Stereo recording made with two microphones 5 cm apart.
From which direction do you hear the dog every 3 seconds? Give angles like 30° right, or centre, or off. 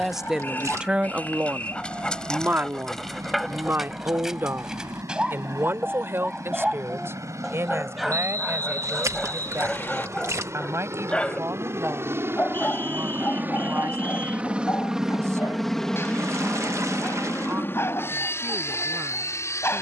20° left, 10° right, 10° right, 10° left, 40° left, 50° left, 50° left.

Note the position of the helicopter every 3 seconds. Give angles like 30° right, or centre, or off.
80° right, 70° right, 70° right, 60° right, 30° right, 20° left, 50° left.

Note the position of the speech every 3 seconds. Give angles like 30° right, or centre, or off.
30° right, 50° right, 50° right, 60° right, 60° right, 60° right, 60° right.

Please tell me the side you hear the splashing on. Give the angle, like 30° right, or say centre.
60° right.